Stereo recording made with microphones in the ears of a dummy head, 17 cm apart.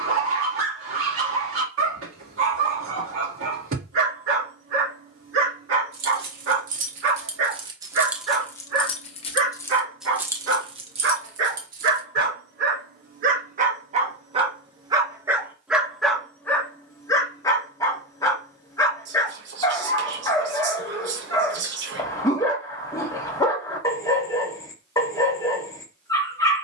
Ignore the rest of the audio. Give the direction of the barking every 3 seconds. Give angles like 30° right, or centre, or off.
80° right, 80° right, 80° right, 70° right, 40° right, 10° left, 20° left, 20° left, 20° left.